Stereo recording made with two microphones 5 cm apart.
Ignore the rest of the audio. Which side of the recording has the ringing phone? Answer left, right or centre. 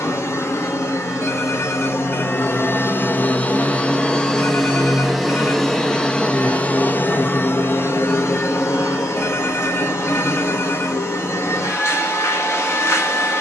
left.